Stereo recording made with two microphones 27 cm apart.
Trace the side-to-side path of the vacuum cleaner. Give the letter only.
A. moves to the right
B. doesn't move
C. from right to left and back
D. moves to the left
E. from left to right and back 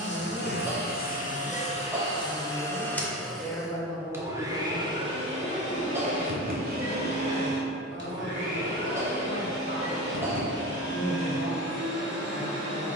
A.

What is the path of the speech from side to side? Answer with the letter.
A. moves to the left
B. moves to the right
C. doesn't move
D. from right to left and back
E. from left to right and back
A.